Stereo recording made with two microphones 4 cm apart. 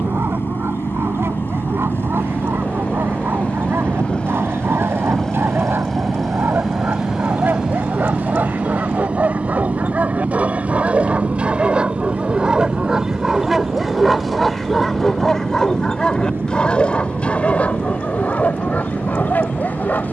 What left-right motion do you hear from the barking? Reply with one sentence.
In this clip you hear the barking move to the left.